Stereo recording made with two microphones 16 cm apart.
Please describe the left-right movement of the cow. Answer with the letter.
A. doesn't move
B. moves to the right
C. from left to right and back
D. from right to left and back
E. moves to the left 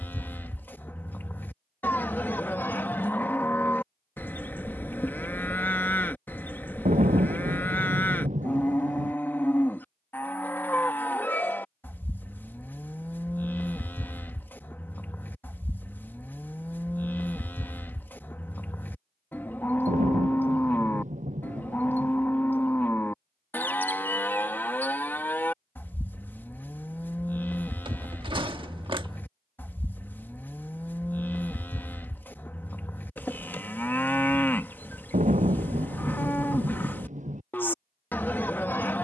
A.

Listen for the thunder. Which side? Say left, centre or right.
right.